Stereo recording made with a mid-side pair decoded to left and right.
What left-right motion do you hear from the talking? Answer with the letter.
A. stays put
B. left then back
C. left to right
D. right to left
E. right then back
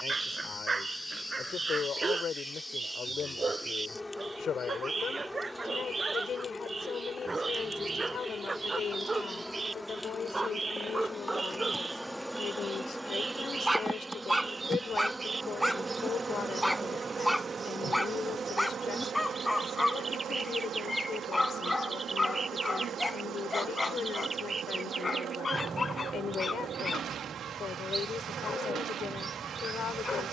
A.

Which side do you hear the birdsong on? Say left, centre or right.
right.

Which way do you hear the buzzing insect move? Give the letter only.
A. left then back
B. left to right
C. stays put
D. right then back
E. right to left
B.